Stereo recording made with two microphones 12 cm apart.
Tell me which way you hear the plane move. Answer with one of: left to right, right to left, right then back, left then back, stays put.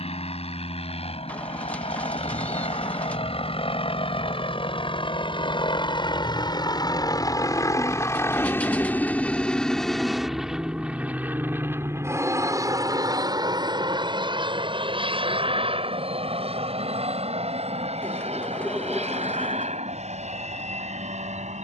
left to right.